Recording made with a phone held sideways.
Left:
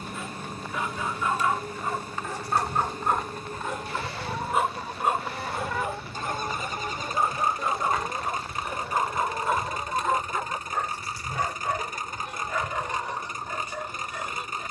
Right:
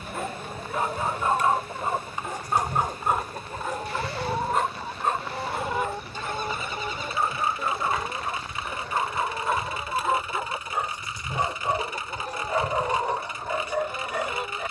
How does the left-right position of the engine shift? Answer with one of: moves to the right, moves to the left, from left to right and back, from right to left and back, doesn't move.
doesn't move.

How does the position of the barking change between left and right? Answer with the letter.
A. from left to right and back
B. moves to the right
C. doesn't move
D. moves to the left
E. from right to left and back
E.